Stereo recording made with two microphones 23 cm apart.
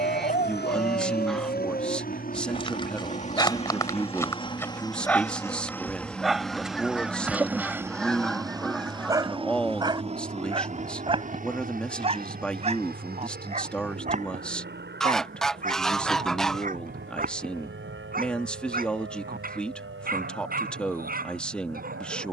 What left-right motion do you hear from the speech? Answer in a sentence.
In this clip you hear the speech stay in one place.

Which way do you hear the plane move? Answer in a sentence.
You can hear the plane move to the right.